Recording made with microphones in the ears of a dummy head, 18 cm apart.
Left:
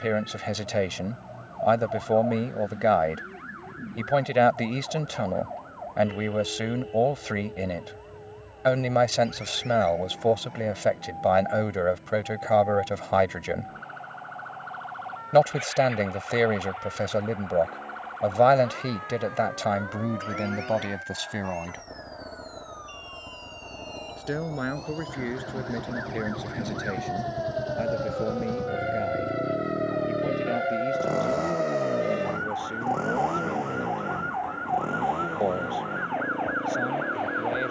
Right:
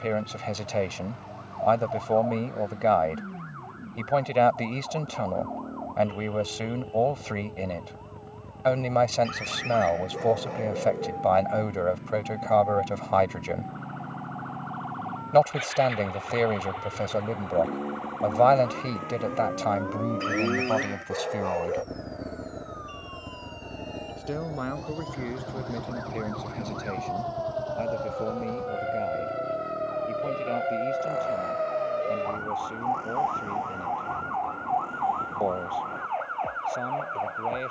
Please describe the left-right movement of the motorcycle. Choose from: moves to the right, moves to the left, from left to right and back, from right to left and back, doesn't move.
moves to the left.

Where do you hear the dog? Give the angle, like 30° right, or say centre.
80° right.